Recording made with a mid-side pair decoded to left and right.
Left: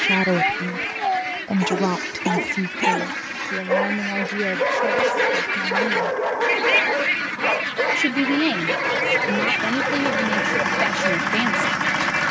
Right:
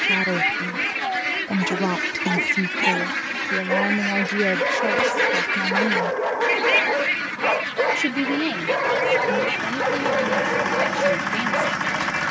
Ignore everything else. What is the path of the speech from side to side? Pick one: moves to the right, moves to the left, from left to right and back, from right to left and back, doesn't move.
from left to right and back.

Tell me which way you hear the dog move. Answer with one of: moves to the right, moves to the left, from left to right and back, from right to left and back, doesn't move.
moves to the right.